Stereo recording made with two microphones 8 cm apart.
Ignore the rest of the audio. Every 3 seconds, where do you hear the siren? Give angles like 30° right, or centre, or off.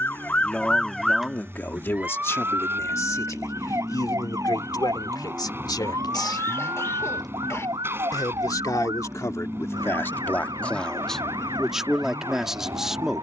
10° right, 50° right, 60° right, 60° right, 70° right.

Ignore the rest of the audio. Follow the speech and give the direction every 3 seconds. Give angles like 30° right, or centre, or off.
30° left, 60° left, 60° left, 20° left, 10° right.